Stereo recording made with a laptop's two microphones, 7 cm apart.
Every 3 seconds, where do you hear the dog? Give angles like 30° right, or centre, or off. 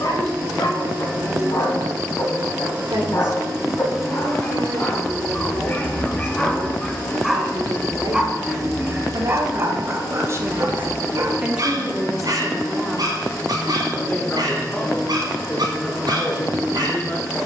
60° left, 30° left, centre, 40° right, 60° right, 70° right.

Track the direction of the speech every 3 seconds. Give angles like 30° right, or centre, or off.
80° right, 80° right, 80° right, 40° right, 10° left, 30° left.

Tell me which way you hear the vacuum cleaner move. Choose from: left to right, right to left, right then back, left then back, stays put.
right to left.